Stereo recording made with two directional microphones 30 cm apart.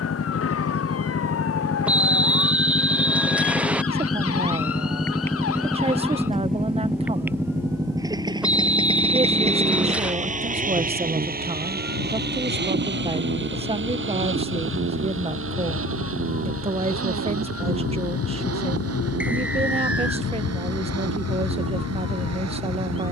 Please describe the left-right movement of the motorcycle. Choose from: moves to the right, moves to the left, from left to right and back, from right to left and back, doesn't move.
moves to the right.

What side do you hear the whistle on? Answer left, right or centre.
centre.